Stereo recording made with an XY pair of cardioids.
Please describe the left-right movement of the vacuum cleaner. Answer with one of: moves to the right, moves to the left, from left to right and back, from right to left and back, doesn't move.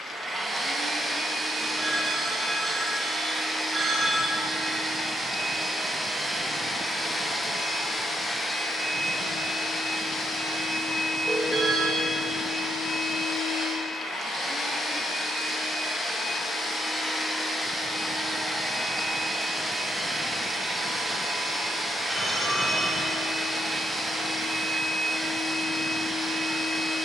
from right to left and back.